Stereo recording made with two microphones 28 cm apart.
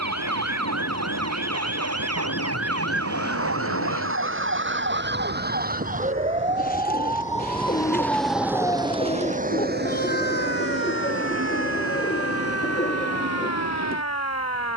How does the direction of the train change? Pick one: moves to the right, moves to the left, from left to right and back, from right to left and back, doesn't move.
moves to the right.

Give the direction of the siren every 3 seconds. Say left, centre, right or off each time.
right, right, centre, left, left.